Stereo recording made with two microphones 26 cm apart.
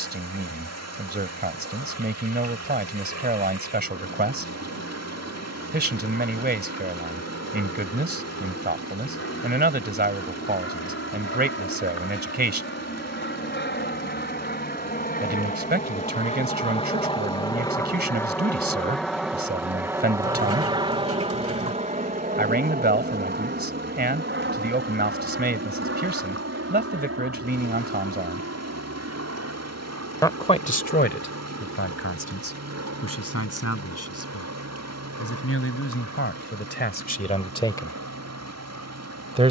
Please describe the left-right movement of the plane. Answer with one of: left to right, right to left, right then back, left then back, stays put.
left to right.